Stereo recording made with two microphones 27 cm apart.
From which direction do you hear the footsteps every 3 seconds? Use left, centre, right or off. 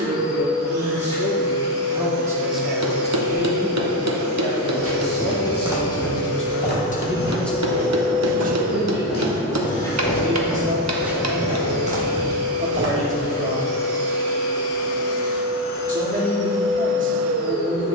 off, right, left, centre, right, off.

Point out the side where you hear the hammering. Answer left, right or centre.
right.